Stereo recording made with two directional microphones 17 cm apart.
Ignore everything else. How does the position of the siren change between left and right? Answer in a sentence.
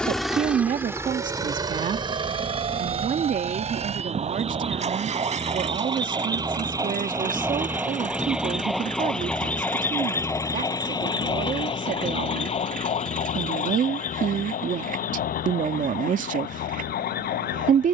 In this clip you hear the siren travel towards the left.